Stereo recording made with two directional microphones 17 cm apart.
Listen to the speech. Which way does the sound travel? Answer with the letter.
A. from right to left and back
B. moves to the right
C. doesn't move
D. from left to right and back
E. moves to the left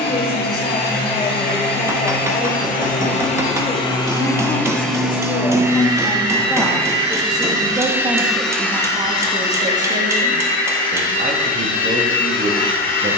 B.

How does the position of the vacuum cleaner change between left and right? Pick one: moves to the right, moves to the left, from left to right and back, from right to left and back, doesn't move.
from left to right and back.